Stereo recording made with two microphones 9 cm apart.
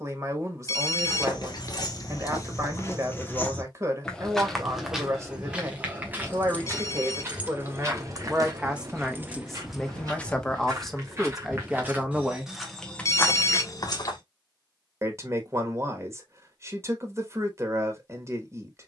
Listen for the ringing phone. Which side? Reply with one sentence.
You can hear the ringing phone on the left.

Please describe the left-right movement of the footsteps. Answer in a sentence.
You can hear the footsteps go right and come back.